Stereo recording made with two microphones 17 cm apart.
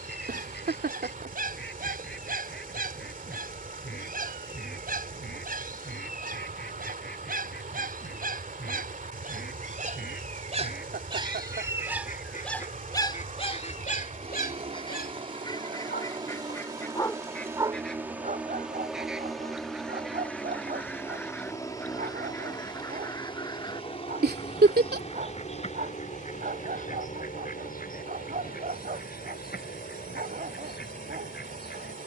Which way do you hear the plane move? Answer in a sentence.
You can hear the plane move from right to left.